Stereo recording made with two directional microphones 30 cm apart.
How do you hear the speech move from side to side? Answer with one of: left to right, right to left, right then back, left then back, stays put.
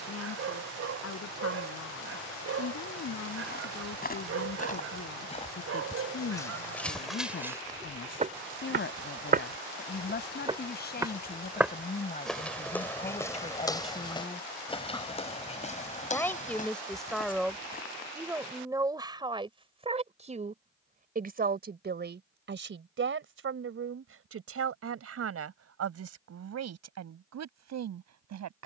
left to right.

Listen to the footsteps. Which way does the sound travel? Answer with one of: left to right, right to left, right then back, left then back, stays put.
right then back.